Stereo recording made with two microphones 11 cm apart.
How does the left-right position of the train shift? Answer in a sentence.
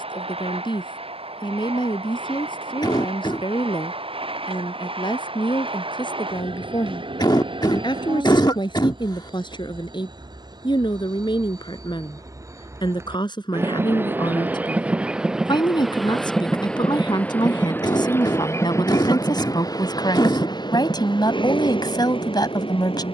You can hear the train move to the left.